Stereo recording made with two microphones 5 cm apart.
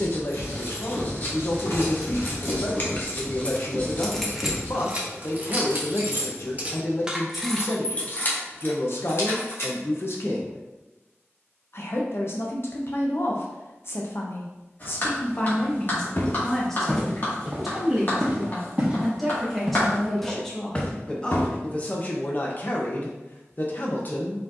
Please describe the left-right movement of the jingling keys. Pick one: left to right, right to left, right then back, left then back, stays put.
right then back.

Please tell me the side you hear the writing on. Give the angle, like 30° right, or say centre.
40° left.